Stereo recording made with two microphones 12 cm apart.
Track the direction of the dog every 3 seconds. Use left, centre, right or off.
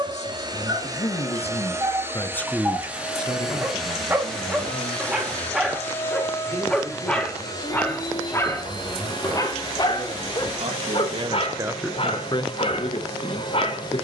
right, centre, centre, left, left.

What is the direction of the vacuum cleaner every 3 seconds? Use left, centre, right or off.
right, centre, left, left, left.